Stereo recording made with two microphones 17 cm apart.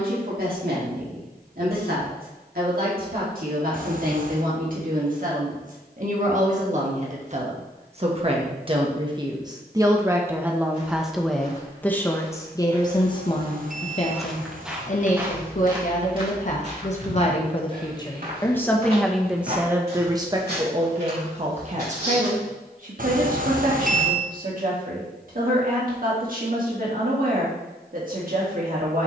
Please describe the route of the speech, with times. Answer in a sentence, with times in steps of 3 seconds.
You can hear the speech on the right from 0 s, in the centre from 9 s, on the left from 12 s, in the centre from 18 s and on the right from 21 s.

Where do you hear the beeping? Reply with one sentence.
In this clip you hear the beeping on the right.